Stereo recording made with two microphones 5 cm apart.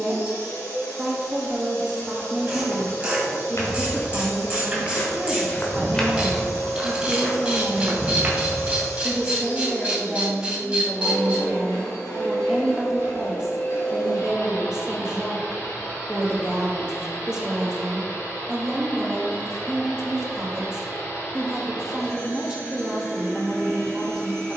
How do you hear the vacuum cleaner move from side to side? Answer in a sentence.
In this clip you hear the vacuum cleaner stay in one place.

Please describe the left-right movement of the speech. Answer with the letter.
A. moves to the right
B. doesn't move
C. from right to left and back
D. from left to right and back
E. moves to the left
B.